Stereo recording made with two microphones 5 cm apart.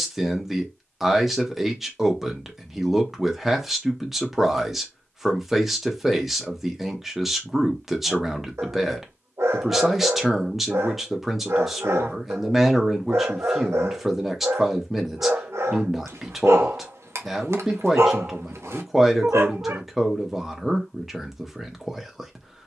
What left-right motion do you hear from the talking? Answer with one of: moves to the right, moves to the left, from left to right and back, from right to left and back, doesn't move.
doesn't move.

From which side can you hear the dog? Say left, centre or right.
right.